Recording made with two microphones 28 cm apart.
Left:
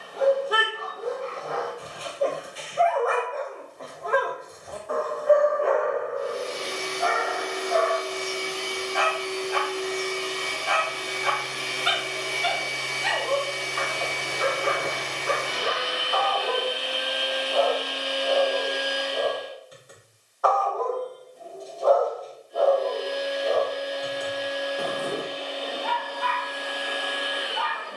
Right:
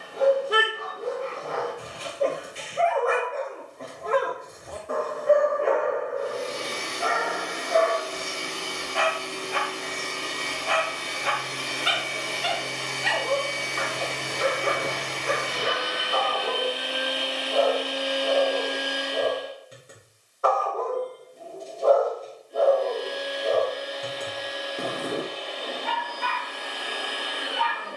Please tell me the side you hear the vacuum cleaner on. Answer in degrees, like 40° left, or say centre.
50° right.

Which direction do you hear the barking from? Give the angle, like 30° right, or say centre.
30° right.